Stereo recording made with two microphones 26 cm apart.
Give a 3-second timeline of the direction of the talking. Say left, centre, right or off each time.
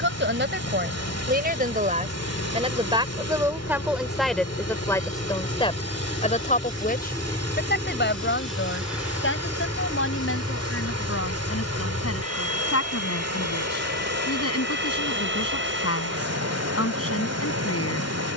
right, centre, left, left, left, left.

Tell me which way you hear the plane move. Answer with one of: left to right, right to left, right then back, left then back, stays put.
left to right.